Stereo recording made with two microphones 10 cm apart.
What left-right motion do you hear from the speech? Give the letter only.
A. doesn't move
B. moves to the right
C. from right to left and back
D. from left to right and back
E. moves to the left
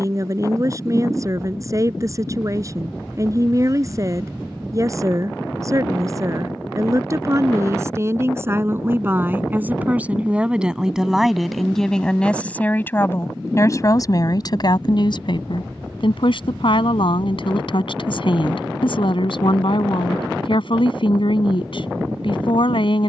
E.